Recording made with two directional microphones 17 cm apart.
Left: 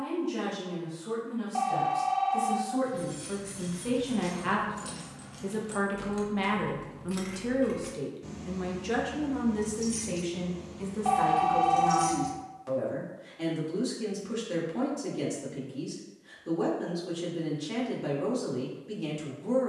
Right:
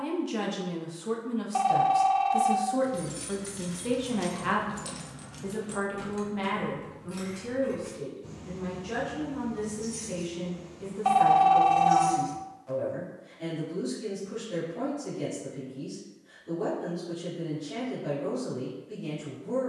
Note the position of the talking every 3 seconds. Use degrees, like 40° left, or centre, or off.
40° right, centre, 40° left, 60° left, 70° left, 70° left, 70° left.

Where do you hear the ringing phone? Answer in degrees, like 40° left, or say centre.
30° right.